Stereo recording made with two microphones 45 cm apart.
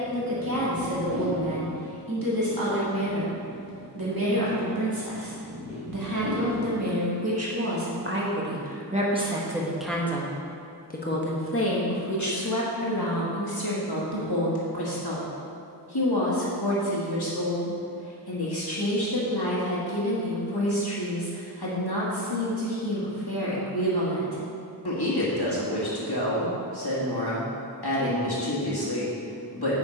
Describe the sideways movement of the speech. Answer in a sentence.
You can hear the speech move from right to left.